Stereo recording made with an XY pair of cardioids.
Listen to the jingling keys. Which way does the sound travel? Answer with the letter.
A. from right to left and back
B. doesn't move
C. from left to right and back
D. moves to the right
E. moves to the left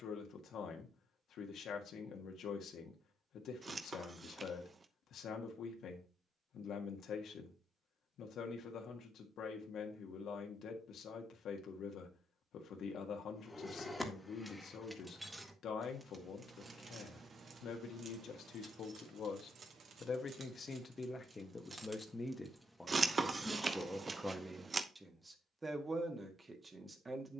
C.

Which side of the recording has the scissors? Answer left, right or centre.
right.